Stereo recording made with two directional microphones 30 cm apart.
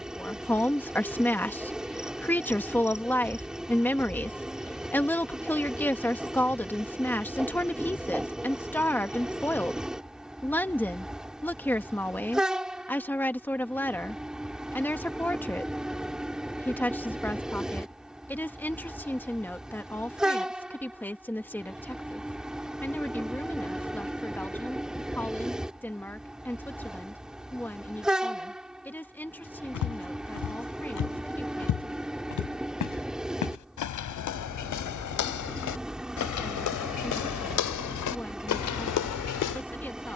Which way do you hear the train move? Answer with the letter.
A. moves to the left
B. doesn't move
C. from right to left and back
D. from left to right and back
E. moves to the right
B.